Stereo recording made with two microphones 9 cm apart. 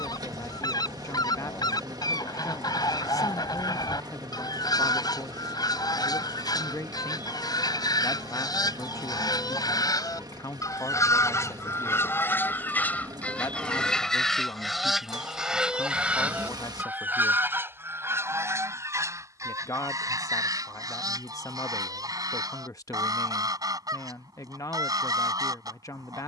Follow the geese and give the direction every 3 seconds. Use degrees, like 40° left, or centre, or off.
50° left, 50° left, 50° left, 40° left, 10° left, 10° right, 30° right, 40° right, 40° right.